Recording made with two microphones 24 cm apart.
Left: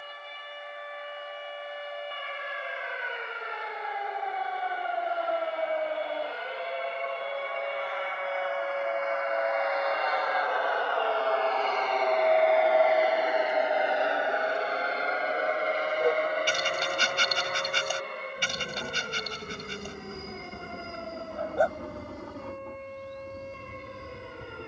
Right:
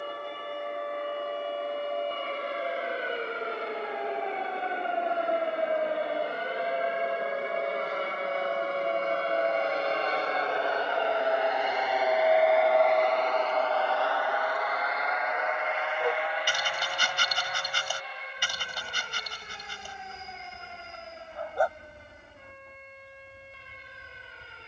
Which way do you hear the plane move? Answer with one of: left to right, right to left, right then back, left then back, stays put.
right to left.